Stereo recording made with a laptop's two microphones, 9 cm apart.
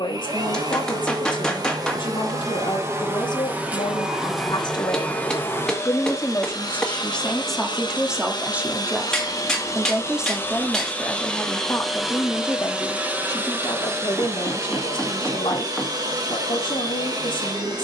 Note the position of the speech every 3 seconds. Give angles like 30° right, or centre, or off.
60° left, 60° left, centre, centre, 50° left, 60° left.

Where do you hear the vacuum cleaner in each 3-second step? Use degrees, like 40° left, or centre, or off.
40° right, centre, 50° left, 20° left, 20° right, 40° right.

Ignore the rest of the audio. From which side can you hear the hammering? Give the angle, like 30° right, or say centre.
10° left.